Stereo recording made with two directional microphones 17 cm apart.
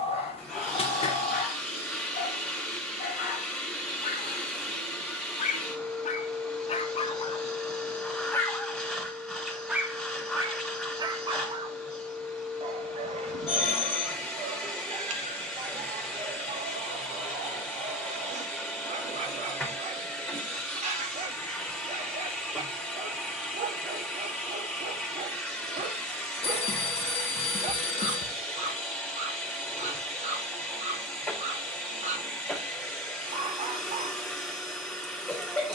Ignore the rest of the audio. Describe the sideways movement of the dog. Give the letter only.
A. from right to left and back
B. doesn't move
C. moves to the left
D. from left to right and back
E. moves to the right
E.